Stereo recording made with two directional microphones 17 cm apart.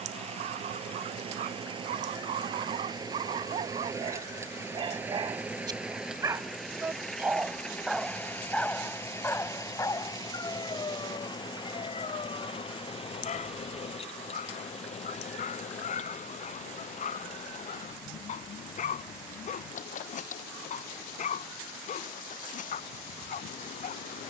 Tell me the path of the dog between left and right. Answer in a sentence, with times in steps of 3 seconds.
In this clip you hear the dog on the right from 0 s, in the centre from 6 s and on the left from 9 s.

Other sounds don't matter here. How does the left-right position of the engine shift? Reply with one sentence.
In this clip you hear the engine travel towards the left.